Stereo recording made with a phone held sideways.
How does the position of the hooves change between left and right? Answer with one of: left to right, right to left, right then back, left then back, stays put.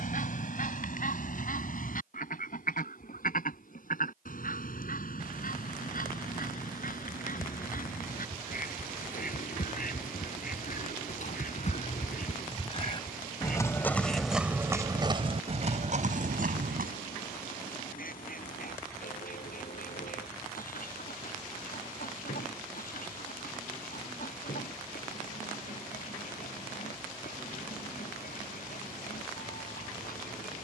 left to right.